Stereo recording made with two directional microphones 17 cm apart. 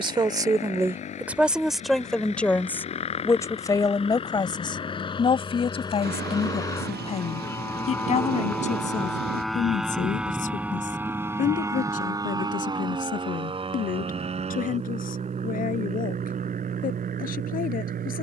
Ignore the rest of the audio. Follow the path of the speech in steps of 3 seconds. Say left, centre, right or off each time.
centre, left, left, left, left, left.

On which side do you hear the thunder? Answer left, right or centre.
right.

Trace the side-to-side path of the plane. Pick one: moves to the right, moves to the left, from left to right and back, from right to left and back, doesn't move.
moves to the right.